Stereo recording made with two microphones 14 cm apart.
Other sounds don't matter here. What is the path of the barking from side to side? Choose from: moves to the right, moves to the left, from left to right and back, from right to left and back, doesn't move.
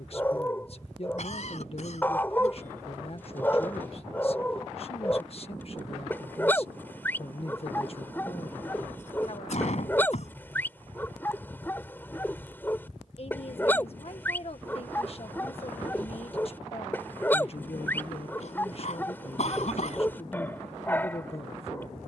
doesn't move.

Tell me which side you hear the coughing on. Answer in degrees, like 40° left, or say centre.
60° left.